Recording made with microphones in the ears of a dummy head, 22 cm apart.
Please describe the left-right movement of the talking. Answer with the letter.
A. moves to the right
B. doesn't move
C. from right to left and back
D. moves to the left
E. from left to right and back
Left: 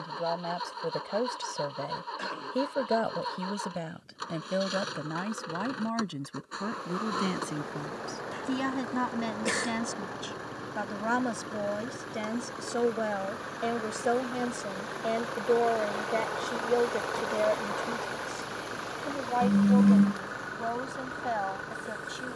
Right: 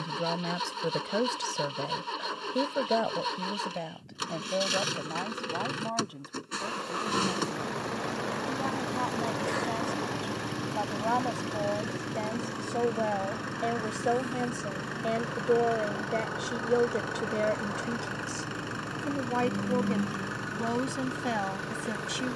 C.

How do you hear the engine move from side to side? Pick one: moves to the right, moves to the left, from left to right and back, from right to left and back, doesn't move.
doesn't move.